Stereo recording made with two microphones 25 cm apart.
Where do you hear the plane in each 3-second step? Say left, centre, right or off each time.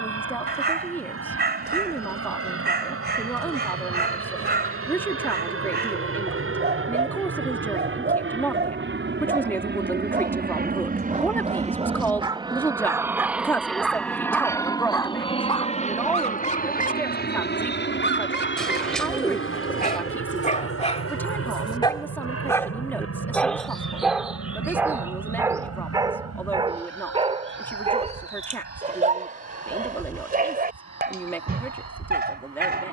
right, right, right, right, centre, left, left, left, left, left, left.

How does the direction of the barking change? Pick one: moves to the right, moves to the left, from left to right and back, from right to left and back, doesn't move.
from right to left and back.